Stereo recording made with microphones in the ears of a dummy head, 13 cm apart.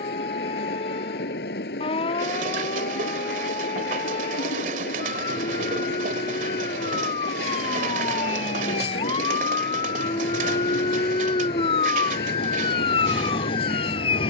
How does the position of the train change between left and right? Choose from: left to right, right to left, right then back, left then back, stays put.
stays put.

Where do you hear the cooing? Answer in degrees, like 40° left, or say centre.
50° right.